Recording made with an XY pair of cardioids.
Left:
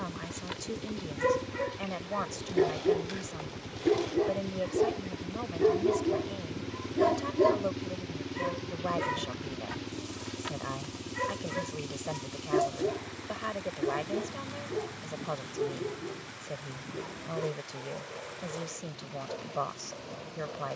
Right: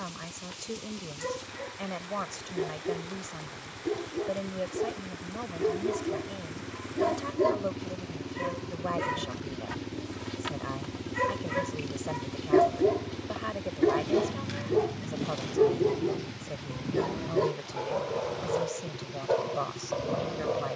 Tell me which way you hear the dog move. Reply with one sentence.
In this clip you hear the dog travel towards the right.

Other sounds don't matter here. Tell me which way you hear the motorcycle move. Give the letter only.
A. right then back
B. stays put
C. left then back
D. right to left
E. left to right
E.